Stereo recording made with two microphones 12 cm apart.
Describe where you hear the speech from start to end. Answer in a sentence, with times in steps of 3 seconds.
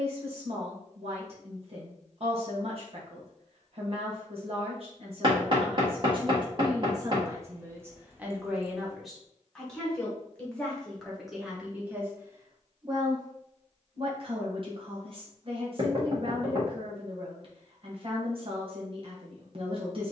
You can hear the speech on the right from 0 s, in the centre from 9 s and on the right from 12 s.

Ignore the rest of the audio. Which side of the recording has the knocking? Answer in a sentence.
You can hear the knocking on the right.